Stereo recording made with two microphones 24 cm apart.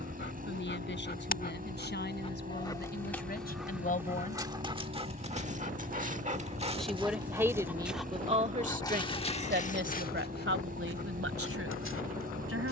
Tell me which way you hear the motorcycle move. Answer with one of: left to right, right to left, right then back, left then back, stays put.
stays put.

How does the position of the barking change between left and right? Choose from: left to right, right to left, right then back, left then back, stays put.
right then back.